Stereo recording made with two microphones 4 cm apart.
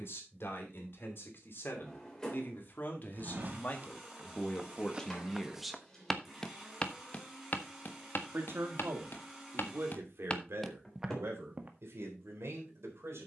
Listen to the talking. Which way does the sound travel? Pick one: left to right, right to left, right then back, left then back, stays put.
left to right.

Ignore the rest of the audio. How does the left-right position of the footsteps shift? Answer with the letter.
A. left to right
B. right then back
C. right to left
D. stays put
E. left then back
E.